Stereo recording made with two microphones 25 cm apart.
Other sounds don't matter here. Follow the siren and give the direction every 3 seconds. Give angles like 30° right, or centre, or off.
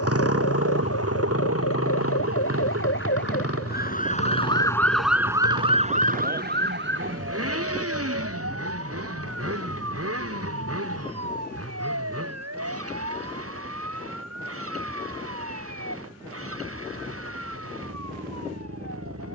70° left, 20° left, 50° right, 70° right, 80° right, 80° right, 80° right.